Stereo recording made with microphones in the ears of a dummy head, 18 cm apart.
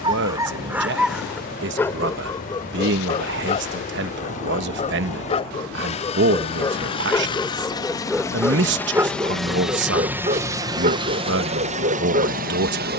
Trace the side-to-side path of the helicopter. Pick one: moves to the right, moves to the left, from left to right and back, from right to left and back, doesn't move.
moves to the right.